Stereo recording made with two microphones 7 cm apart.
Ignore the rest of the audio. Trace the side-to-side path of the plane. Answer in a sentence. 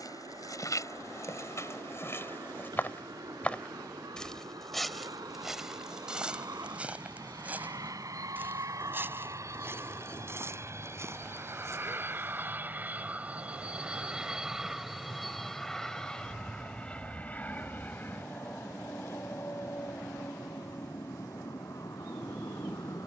You can hear the plane move to the left.